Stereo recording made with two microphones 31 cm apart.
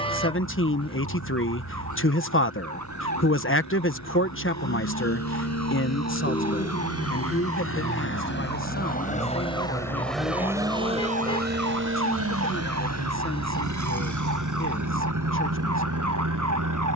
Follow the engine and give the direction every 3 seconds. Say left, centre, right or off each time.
left, left, left, centre, right, right.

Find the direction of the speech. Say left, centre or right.
left.